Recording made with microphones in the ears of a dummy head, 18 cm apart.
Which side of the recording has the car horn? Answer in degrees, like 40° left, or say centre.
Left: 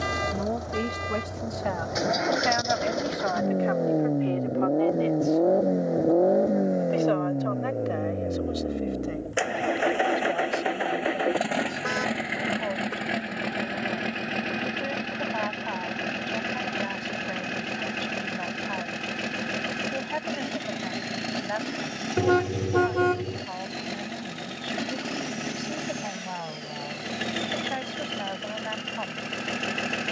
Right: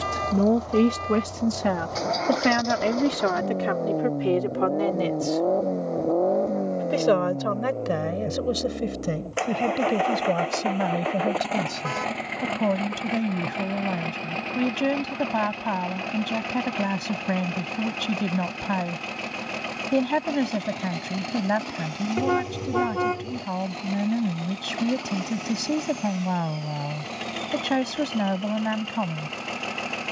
20° left.